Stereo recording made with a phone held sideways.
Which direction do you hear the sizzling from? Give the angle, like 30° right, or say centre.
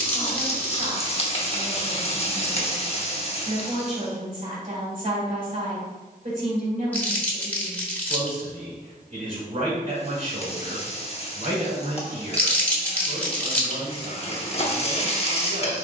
40° left.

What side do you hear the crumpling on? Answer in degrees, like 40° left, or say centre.
10° left.